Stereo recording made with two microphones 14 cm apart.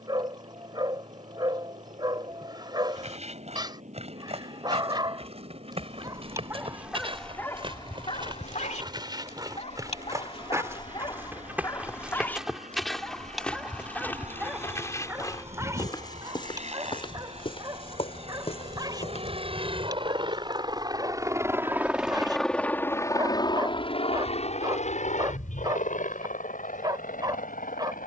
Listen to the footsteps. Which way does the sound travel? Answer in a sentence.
You can hear the footsteps move from right to left.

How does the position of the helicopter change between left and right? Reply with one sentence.
You can hear the helicopter move to the left.